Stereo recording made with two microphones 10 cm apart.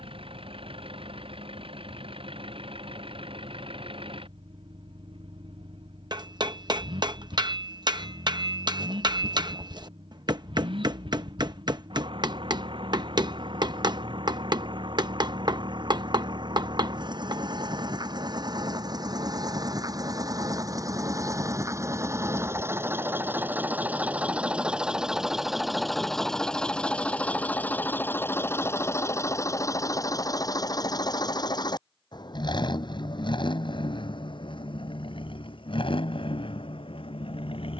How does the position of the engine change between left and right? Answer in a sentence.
You can hear the engine move from right to left.